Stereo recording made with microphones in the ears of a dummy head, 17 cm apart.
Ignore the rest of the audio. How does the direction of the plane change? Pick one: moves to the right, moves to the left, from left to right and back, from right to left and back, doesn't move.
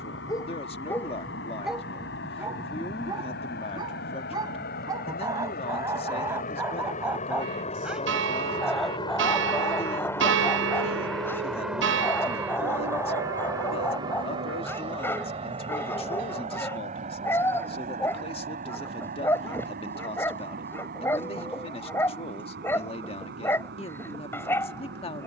moves to the right.